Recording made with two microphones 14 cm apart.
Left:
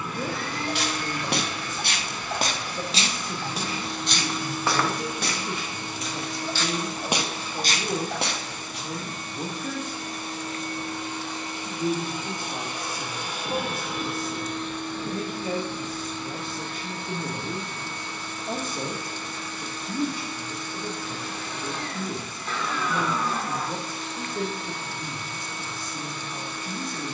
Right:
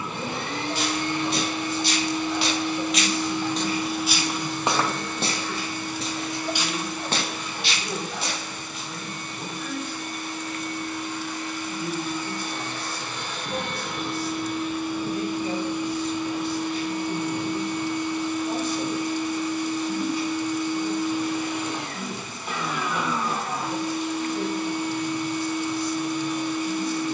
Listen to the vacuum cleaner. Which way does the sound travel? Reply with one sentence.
In this clip you hear the vacuum cleaner go left and come back.